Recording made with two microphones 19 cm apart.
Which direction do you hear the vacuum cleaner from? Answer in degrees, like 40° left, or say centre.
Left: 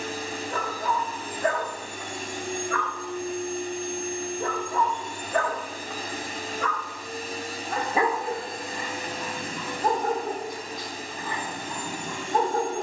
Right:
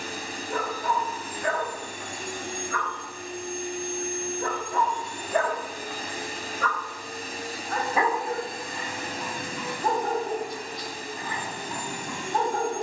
60° left.